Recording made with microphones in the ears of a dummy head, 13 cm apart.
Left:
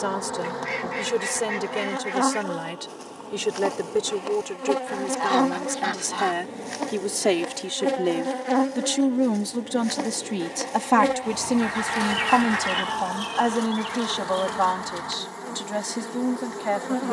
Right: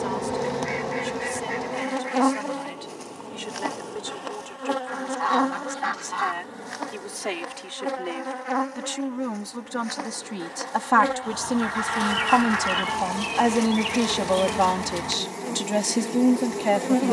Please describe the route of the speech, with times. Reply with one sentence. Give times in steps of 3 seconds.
In this clip you hear the speech on the left from 0 s, in the centre from 12 s and on the right from 15 s.